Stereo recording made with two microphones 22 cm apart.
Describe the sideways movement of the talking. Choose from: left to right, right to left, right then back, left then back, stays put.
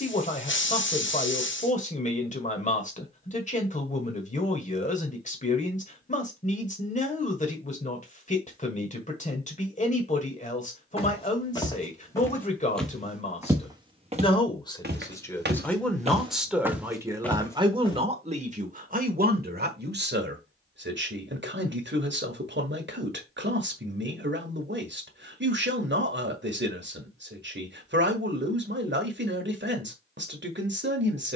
left to right.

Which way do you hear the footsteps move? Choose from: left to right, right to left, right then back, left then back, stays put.
right then back.